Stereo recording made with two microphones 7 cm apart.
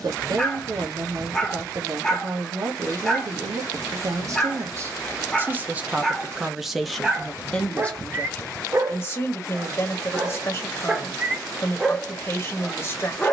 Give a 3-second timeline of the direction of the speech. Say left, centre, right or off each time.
right, right, centre, left, left.